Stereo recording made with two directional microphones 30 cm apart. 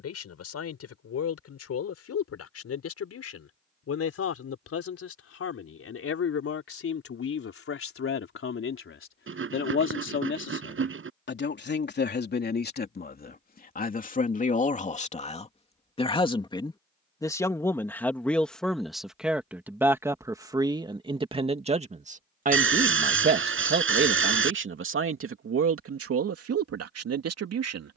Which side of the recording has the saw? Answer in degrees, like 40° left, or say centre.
40° right.